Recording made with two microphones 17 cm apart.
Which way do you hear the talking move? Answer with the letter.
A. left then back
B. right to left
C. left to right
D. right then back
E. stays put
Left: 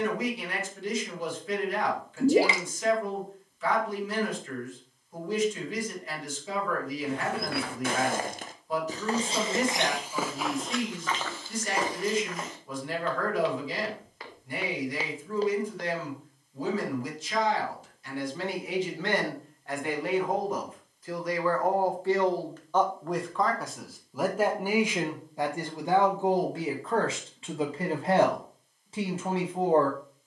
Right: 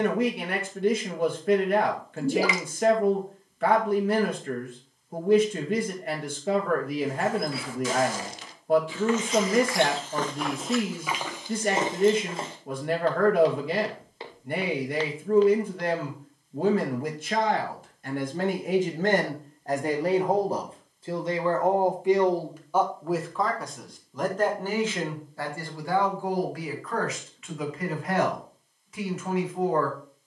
B.